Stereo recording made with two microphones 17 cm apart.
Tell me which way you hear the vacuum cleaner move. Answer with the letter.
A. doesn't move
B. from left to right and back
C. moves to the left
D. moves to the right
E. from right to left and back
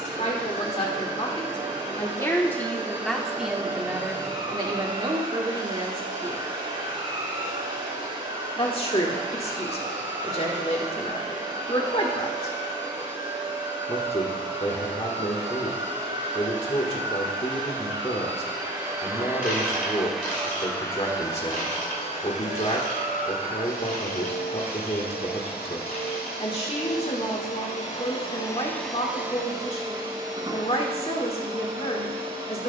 E.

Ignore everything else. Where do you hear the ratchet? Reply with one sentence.
In this clip you hear the ratchet on the left.